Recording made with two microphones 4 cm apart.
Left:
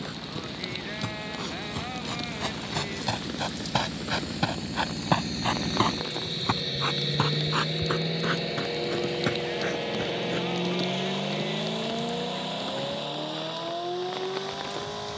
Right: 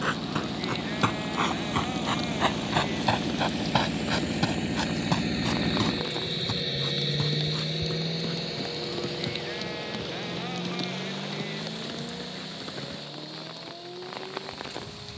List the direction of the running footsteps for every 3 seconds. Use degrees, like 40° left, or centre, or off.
50° right, 10° left, 50° left, 60° left, off.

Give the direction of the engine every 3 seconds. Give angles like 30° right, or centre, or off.
60° right, 40° right, 10° left, 40° left, 60° left.